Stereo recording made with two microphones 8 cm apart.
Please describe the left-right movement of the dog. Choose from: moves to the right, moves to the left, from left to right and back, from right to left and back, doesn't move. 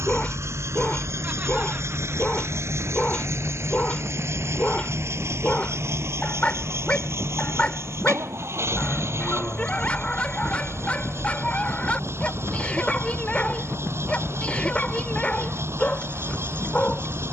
doesn't move.